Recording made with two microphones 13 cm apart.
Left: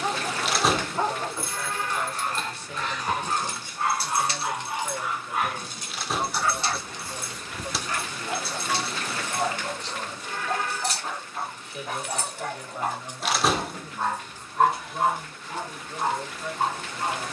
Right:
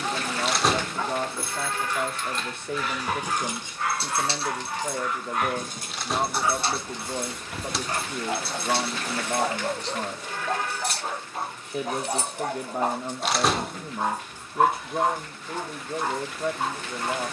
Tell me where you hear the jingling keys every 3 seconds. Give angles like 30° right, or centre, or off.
10° left, 30° right, 60° right, 60° right, 20° right, off.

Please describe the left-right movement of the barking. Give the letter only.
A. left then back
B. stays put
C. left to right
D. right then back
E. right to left
D.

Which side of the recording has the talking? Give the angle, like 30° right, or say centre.
60° right.